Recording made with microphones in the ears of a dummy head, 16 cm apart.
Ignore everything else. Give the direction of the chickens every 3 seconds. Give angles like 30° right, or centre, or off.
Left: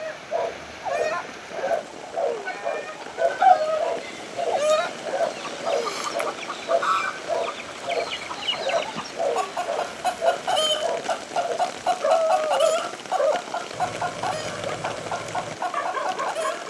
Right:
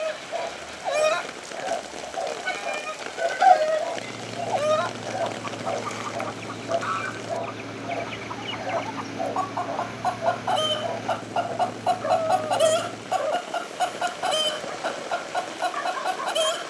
40° right, 10° left, 50° left, 20° left, 30° right, 40° right.